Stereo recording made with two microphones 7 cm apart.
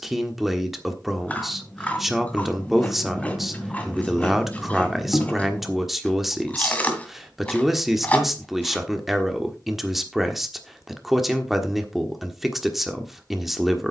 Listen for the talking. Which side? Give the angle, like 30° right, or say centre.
centre.